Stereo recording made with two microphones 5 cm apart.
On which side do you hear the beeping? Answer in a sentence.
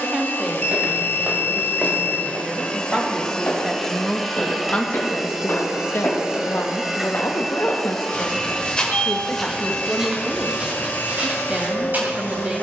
In this clip you hear the beeping on the left.